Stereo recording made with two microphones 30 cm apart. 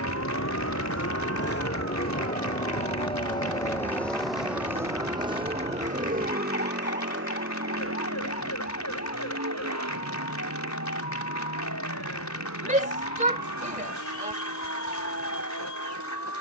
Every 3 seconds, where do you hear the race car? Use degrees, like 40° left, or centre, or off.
40° left, centre, 40° right, 60° right, 70° right, 70° right.